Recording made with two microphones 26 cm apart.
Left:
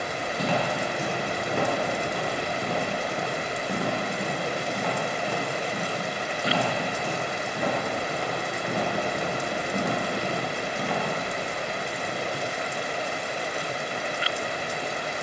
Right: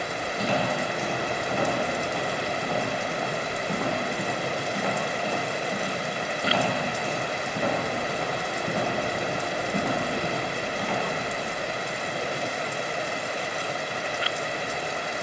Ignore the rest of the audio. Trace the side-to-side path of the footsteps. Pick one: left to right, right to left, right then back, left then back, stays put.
right then back.